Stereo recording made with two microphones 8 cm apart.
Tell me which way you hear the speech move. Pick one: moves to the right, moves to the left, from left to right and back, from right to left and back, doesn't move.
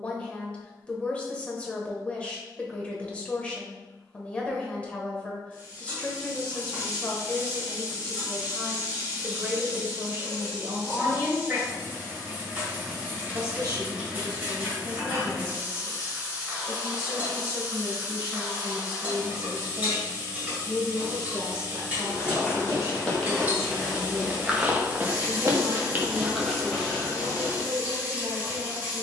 moves to the right.